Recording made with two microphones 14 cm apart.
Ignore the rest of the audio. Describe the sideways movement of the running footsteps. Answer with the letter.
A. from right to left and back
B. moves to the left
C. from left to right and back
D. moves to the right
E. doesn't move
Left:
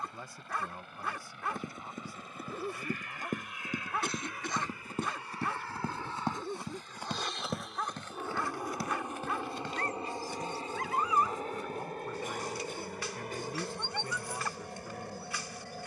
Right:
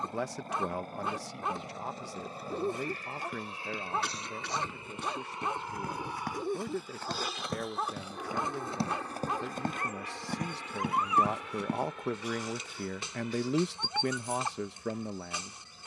D.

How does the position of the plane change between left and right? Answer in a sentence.
In this clip you hear the plane move to the left.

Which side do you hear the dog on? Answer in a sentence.
In this clip you hear the dog on the right.